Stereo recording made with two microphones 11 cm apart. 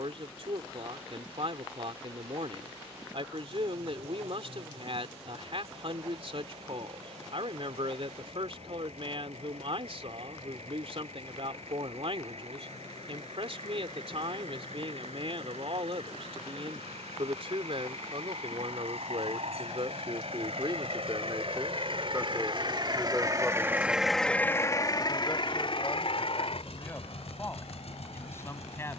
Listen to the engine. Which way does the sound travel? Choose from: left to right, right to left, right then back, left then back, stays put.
right to left.